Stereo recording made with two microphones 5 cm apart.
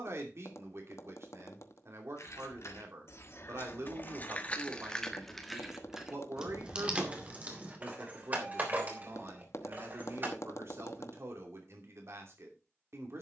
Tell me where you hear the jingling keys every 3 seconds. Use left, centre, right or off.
left, left, right, right, off.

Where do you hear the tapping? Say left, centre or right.
left.